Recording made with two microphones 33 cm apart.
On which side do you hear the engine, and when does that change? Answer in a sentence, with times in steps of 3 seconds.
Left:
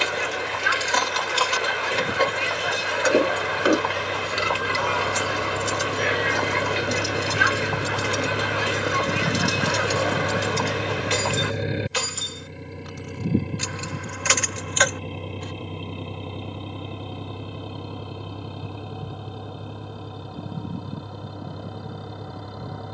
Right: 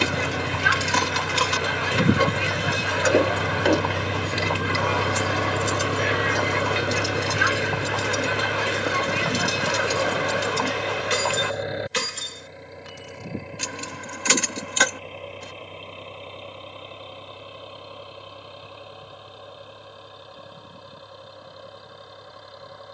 You can hear the engine on the right from 0 s, in the centre from 6 s and on the left from 9 s.